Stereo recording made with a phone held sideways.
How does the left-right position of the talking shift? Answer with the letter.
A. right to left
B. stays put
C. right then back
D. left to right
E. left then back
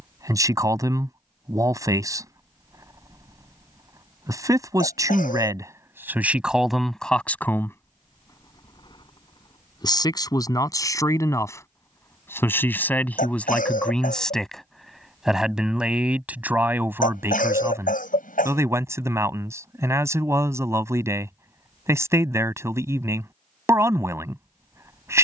E.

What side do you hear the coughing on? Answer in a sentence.
You can hear the coughing on the left.